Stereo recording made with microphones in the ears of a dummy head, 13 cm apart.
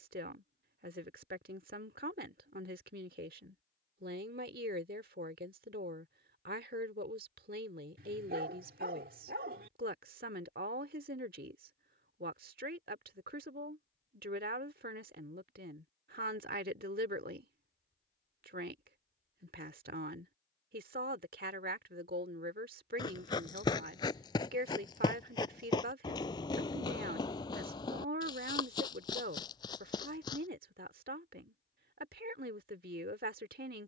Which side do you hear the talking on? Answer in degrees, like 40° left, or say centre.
70° right.